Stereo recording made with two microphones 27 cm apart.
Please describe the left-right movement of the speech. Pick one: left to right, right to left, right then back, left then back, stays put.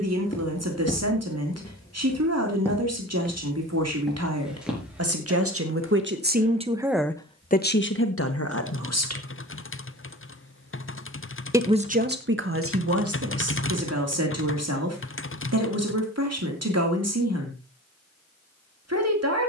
left then back.